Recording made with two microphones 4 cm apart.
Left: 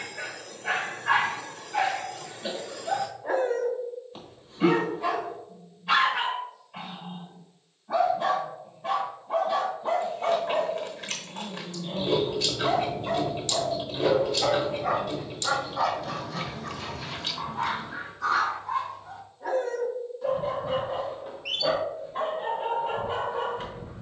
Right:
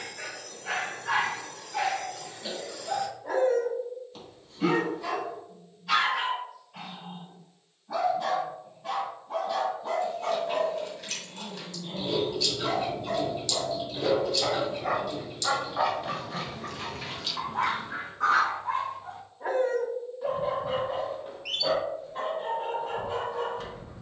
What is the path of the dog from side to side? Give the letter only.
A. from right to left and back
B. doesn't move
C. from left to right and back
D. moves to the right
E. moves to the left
C.